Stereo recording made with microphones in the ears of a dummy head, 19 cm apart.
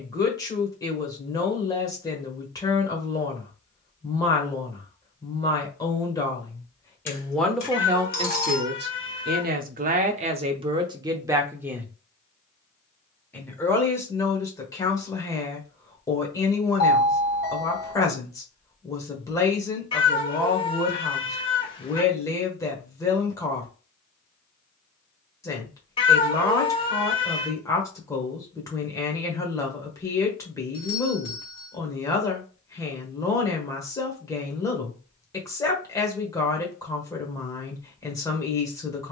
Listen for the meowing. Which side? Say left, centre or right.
left.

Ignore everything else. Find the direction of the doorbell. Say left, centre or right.
left.